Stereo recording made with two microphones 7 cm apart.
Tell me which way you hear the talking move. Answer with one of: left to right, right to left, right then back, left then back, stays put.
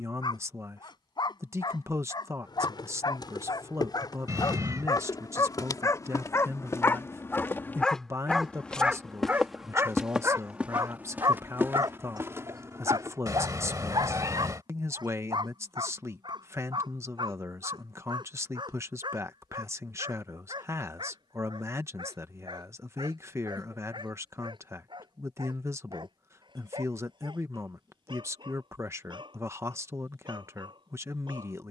stays put.